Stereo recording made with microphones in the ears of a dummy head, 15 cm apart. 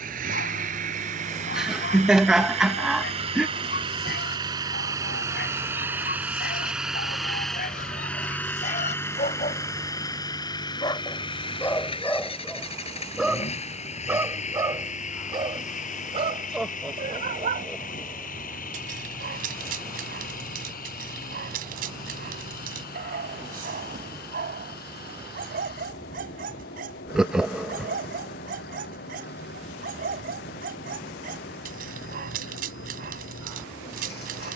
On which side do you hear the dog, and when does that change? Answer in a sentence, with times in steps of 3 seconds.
In this clip you hear the dog on the left from 0 s, in the centre from 12 s and on the right from 15 s.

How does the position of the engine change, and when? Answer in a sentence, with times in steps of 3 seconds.
You can hear the engine on the right from 0 s, in the centre from 6 s and on the left from 9 s.